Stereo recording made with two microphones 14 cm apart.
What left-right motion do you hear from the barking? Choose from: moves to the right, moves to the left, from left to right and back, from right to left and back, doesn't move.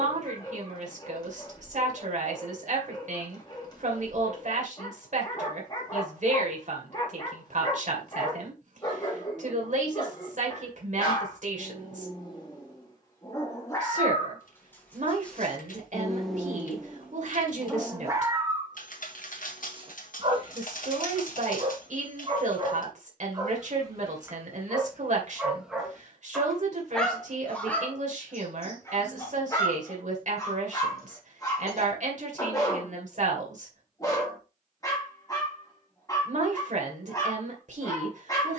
from left to right and back.